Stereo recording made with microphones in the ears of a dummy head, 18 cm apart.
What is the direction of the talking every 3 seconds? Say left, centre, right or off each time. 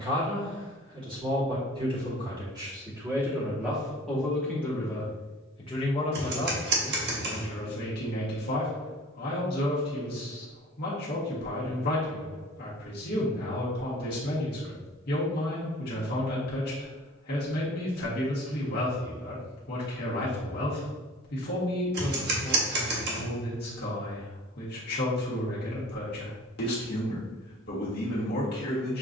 right, centre, left, left, left, left, left, left, left, left.